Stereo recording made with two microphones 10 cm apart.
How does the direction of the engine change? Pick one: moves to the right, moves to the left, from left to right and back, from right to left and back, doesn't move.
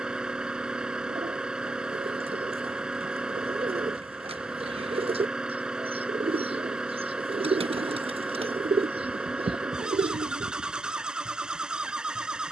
doesn't move.